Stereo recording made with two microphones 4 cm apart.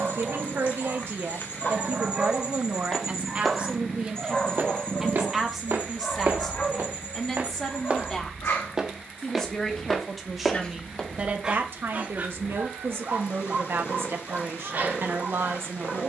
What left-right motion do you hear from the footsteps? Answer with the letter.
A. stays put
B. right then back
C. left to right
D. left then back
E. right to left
B.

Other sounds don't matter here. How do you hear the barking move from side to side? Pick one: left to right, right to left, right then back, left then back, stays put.
left then back.